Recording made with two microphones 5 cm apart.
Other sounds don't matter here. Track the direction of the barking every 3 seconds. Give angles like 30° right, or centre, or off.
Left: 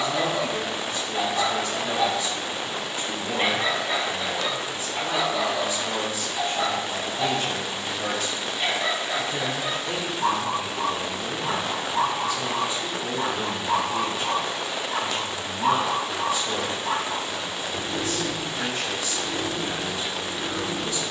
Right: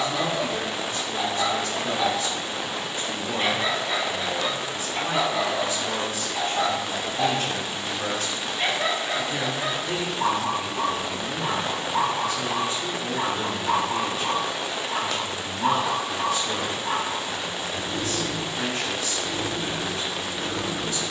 20° left, 10° right, 60° right, 50° right, 30° right, centre, 10° left.